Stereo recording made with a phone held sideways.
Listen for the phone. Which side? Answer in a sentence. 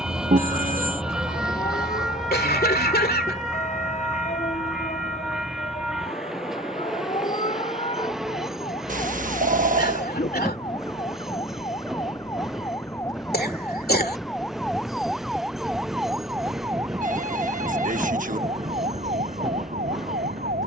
You can hear the phone on the right.